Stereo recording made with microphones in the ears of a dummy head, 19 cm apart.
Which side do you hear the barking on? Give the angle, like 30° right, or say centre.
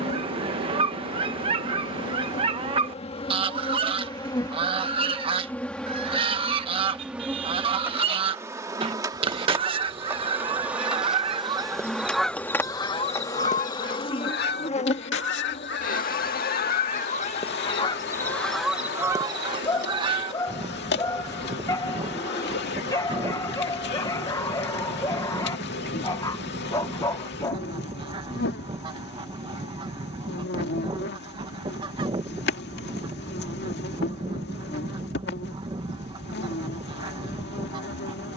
20° left.